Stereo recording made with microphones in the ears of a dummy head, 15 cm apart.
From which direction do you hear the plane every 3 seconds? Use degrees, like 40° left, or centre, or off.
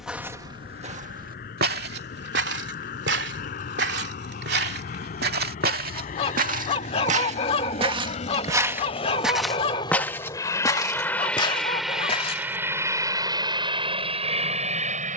70° left, 60° left, 50° left, 20° left, 30° right.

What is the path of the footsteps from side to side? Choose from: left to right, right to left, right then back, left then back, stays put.
right then back.